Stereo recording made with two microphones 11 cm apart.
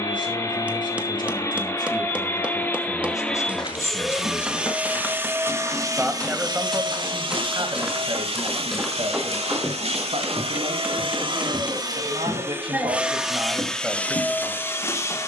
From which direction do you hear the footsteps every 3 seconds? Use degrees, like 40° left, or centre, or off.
off, 30° left, centre, 10° left, 40° left.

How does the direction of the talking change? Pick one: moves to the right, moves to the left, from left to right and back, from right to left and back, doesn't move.
from left to right and back.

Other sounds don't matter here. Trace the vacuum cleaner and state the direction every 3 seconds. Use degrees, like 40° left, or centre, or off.
30° left, 10° right, 50° right, 60° right, centre.